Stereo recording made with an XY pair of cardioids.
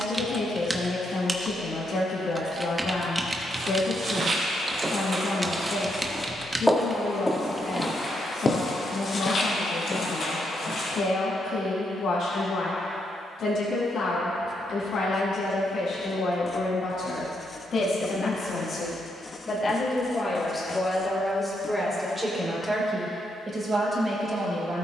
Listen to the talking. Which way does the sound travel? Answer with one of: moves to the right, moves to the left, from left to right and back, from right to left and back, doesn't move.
moves to the right.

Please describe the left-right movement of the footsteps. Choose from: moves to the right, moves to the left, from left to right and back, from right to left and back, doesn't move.
moves to the left.